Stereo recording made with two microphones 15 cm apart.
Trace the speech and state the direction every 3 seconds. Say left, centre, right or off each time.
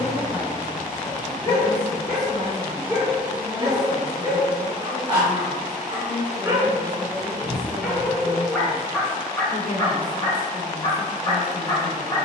left, centre, left, left.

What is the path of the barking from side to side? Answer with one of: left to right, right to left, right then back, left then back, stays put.
right then back.